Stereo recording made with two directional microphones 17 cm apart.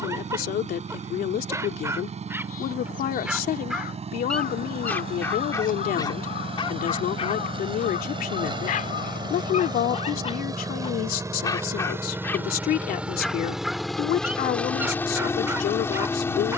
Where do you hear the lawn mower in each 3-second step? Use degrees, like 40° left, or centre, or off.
40° right, 40° right, 30° right, 20° right, centre, 10° left.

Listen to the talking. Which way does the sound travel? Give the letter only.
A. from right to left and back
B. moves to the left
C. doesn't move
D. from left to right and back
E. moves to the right
C.